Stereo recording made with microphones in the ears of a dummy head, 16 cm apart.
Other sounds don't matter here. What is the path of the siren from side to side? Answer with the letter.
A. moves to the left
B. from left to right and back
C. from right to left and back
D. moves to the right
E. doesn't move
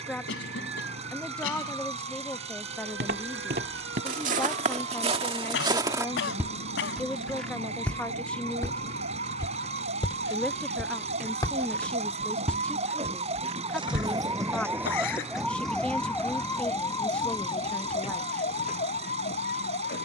A.